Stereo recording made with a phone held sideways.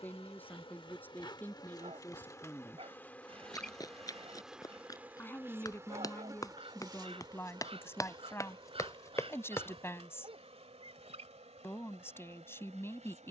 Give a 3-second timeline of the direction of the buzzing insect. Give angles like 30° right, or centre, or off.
30° left, centre, 30° right, 50° right, 60° right.